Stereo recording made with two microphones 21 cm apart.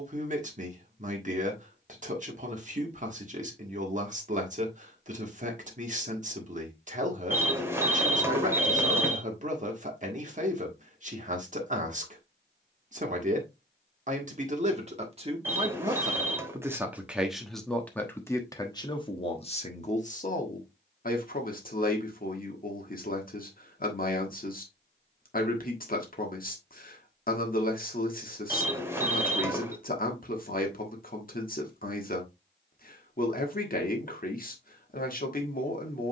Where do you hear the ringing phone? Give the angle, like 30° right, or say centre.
10° right.